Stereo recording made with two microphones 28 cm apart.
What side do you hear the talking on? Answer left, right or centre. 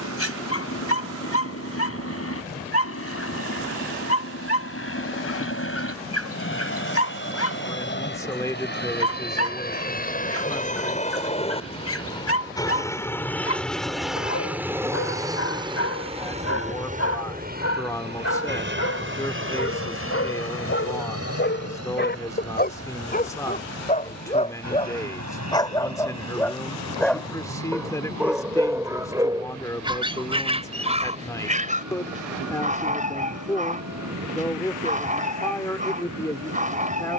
centre.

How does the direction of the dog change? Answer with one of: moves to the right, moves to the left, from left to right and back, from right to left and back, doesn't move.
moves to the right.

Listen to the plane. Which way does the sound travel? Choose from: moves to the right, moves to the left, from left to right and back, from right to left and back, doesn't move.
moves to the right.